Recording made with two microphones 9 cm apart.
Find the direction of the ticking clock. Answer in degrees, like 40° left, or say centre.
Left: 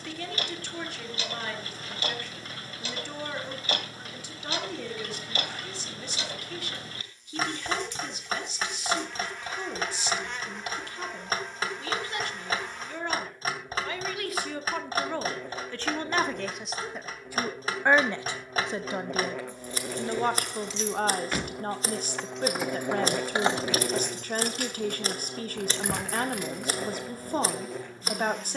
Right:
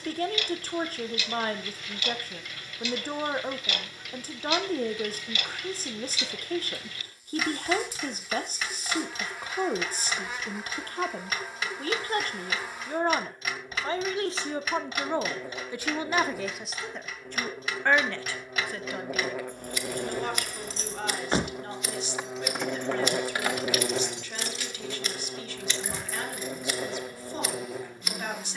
40° left.